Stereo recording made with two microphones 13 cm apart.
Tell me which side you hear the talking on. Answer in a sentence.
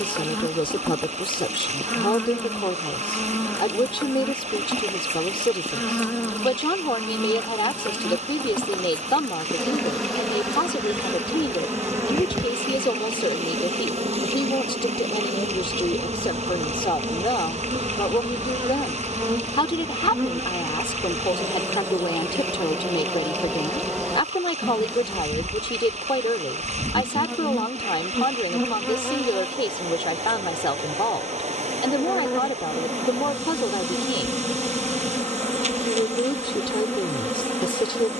You can hear the talking on the left.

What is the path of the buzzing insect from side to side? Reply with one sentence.
You can hear the buzzing insect move from left to right and back again.